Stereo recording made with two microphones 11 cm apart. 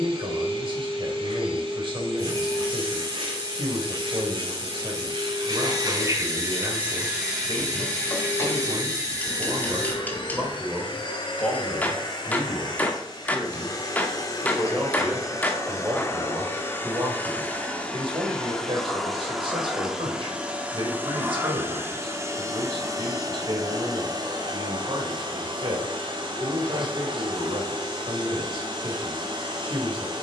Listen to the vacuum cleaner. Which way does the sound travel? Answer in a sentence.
You can hear the vacuum cleaner move from right to left and back again.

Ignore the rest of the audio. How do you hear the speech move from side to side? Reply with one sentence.
You can hear the speech go left and come back.